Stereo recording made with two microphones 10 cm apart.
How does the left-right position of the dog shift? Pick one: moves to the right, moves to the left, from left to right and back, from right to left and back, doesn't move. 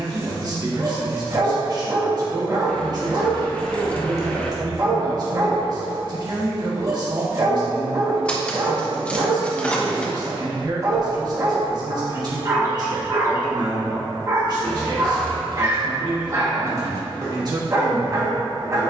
doesn't move.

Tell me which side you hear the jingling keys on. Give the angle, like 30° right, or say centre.
10° left.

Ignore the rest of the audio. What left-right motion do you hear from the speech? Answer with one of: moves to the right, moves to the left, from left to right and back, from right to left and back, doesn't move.
doesn't move.